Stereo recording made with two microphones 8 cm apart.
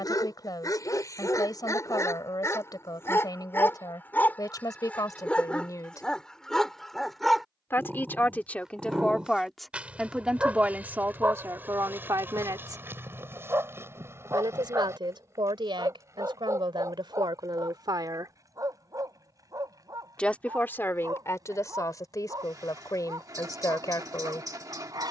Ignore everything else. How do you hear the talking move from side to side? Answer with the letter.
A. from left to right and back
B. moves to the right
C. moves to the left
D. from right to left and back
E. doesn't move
A.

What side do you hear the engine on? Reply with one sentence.
In this clip you hear the engine on the right.